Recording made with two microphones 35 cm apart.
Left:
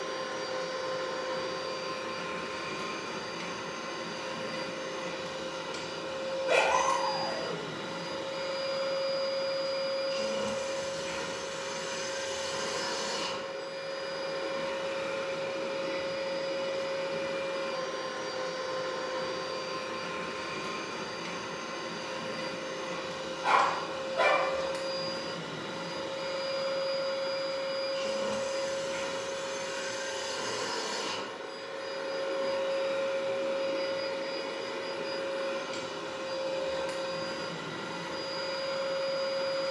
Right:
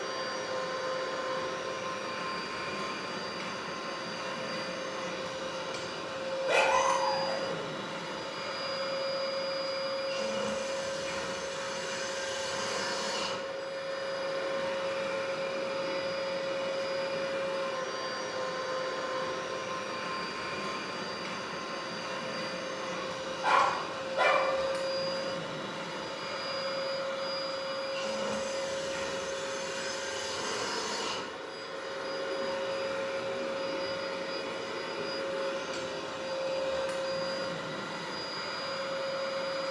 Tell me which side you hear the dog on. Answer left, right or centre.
left.